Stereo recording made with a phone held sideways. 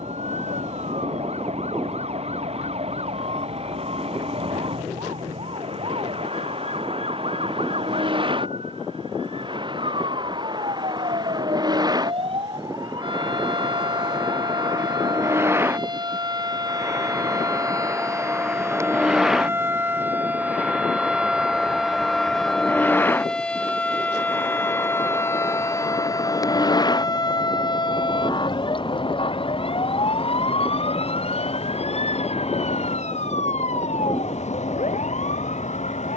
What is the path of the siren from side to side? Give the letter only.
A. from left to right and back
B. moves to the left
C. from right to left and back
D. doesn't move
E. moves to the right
B.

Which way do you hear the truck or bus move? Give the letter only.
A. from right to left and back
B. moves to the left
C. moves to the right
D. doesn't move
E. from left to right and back
B.